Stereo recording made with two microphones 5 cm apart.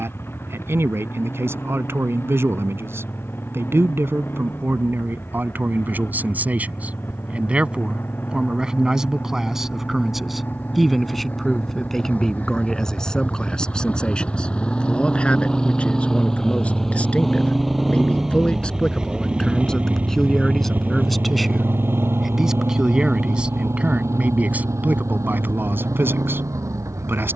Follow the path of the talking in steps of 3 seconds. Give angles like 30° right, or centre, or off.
50° right, 50° right, 20° right, centre, 10° left, 20° left, 10° left, 10° right, 40° right.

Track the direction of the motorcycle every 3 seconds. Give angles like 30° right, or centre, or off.
50° left, 50° left, 40° left, 40° left, 30° left, 10° left, 20° right, 50° right, 70° right.